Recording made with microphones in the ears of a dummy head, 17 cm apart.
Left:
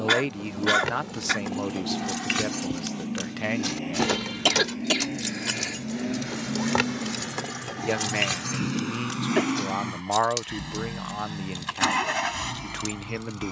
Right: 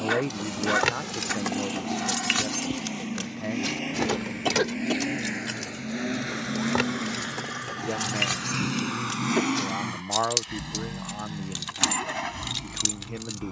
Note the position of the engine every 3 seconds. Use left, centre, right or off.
right, right, right, centre, left.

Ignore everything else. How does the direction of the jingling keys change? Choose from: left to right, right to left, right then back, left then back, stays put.
left then back.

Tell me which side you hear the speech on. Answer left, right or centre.
left.